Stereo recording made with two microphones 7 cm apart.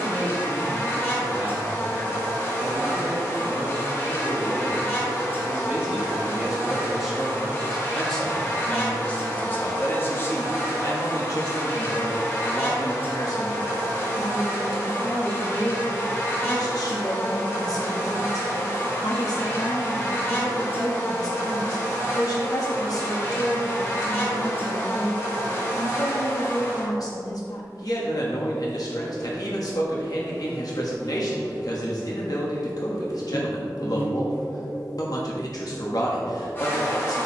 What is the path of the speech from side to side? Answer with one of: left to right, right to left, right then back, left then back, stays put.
right to left.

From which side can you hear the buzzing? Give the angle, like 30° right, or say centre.
30° left.